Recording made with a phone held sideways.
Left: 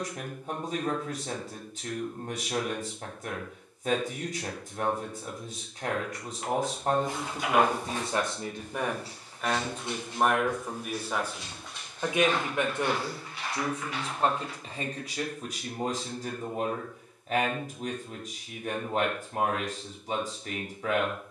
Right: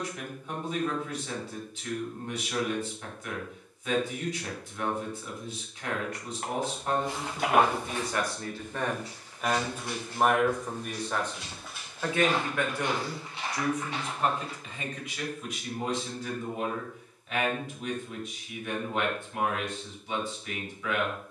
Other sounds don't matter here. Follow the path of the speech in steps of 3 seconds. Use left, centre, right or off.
left, left, left, centre, left, left, left.